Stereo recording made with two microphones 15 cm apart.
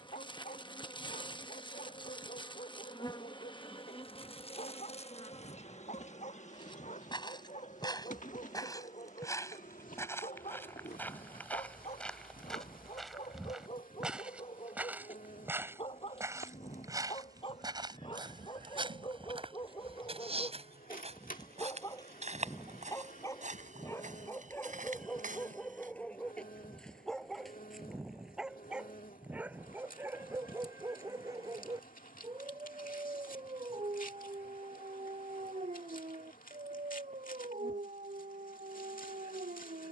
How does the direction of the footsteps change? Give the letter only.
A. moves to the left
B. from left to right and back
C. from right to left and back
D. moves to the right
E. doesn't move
D.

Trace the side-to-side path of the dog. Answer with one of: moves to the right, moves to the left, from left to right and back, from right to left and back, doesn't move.
moves to the right.